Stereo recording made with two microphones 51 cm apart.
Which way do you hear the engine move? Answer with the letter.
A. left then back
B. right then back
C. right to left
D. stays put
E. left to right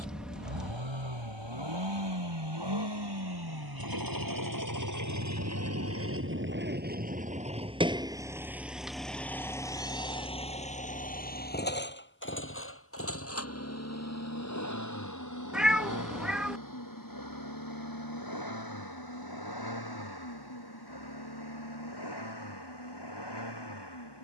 C.